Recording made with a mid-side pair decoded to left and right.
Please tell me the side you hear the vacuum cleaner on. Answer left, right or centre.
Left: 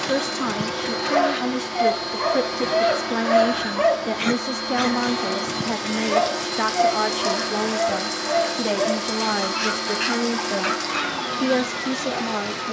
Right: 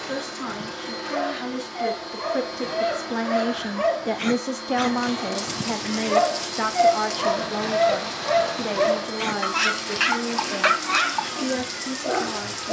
left.